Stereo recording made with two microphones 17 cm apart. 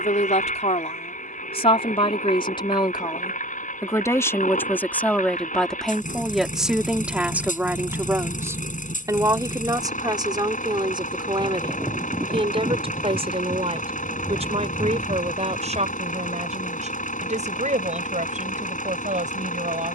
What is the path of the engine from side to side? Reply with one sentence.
In this clip you hear the engine stay in one place.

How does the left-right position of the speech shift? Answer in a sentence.
In this clip you hear the speech travel towards the right.